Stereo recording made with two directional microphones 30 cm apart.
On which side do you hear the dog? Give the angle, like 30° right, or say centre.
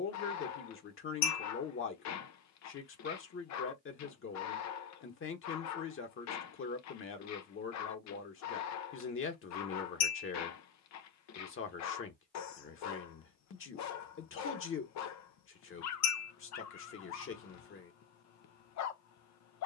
60° left.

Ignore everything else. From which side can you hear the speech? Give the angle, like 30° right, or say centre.
40° left.